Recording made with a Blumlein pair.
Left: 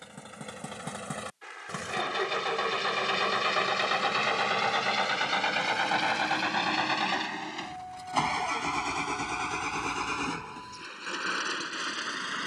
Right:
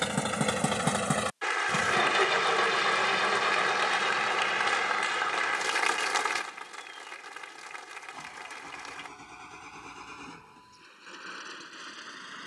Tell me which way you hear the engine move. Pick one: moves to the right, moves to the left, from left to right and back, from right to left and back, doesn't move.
moves to the left.